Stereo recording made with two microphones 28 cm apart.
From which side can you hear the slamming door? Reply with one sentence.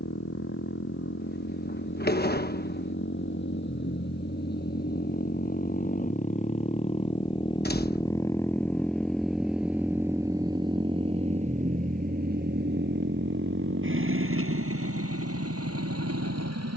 You can hear the slamming door on the left.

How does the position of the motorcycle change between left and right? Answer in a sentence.
You can hear the motorcycle go from the left side to the right.